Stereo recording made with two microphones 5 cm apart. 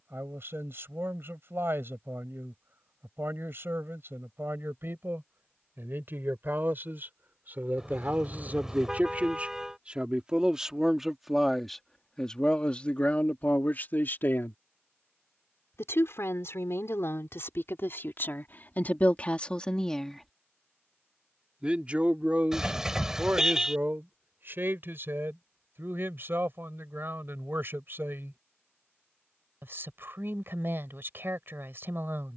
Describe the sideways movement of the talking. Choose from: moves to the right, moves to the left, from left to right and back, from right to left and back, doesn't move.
from right to left and back.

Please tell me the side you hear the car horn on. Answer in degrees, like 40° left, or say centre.
10° right.